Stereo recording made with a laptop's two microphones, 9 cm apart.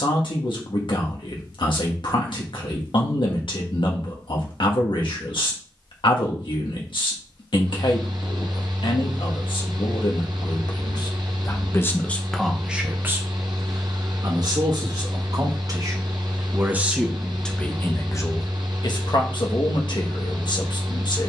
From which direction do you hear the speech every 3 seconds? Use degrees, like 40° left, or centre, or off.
70° left, 70° left, 70° left, 60° left, 30° right, 20° right, 50° left.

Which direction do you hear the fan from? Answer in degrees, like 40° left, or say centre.
60° right.